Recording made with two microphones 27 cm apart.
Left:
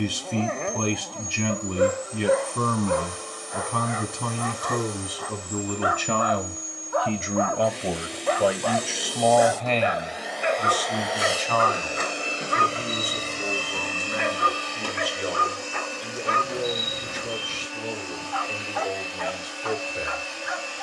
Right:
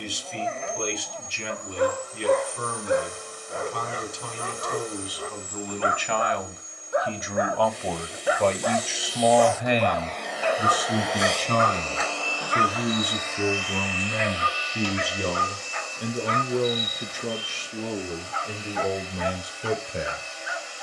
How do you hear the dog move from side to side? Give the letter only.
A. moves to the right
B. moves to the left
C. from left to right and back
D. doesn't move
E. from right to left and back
C.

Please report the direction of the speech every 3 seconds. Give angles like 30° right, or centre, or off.
70° left, 60° left, 20° left, 20° right, 50° right, 60° right, 60° right.